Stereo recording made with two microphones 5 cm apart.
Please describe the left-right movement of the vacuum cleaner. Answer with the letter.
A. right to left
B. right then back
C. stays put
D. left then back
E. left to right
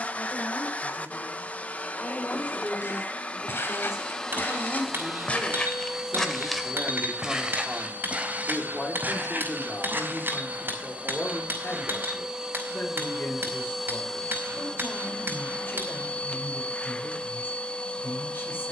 B.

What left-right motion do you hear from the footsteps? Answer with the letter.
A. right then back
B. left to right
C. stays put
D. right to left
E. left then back
B.